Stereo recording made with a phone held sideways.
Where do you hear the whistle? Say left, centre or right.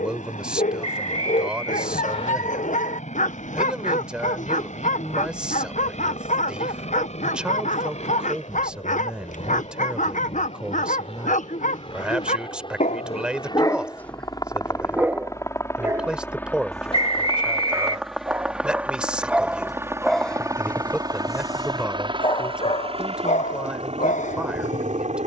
left.